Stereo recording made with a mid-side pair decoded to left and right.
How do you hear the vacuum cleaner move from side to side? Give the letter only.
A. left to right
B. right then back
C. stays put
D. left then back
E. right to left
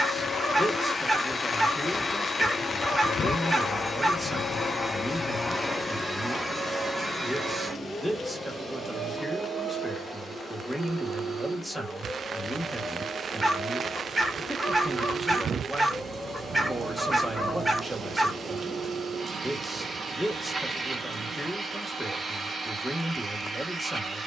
A.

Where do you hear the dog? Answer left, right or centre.
centre.